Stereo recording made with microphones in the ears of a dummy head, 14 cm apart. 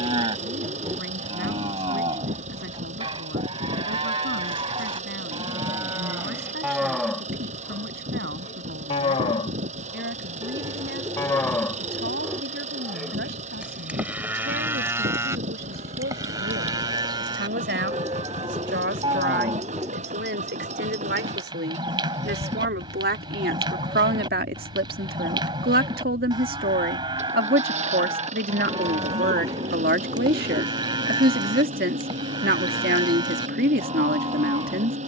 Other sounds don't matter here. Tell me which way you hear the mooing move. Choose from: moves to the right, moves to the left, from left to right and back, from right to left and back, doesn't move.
from right to left and back.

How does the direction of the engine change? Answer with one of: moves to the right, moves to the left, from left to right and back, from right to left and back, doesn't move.
doesn't move.